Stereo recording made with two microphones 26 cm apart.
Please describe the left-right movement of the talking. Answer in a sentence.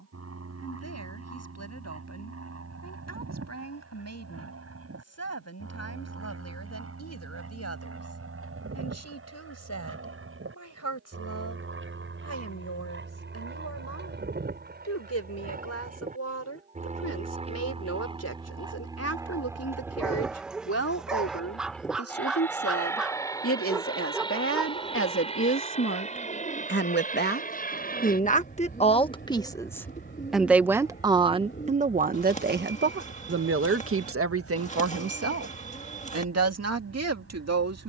You can hear the talking move from left to right.